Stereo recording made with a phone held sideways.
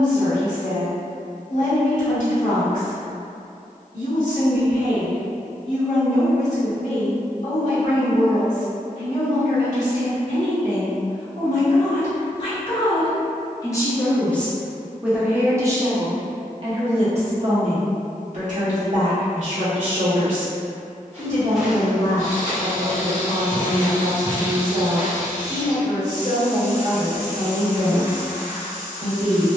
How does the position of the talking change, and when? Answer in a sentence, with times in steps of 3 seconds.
In this clip you hear the talking on the left from 0 s and on the right from 15 s.